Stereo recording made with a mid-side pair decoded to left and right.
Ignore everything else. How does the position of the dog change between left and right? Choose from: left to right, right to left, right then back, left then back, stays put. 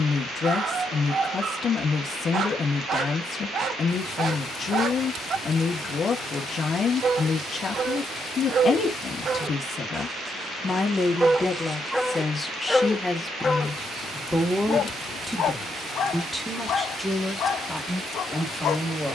right to left.